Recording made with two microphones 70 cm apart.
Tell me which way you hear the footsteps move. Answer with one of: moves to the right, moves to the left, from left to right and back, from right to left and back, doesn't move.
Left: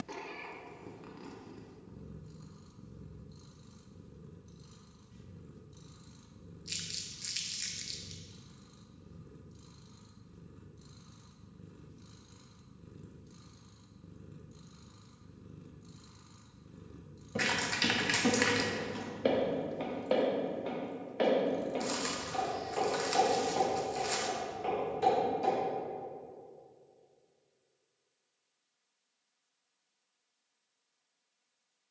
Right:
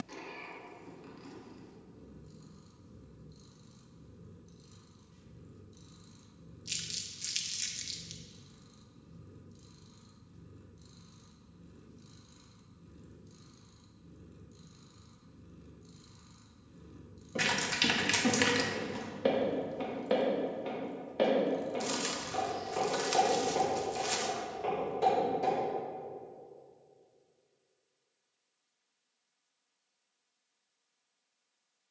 moves to the right.